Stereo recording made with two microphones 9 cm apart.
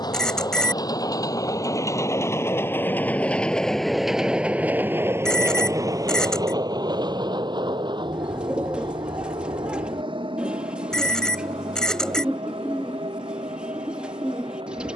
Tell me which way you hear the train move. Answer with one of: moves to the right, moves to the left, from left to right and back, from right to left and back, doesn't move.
moves to the right.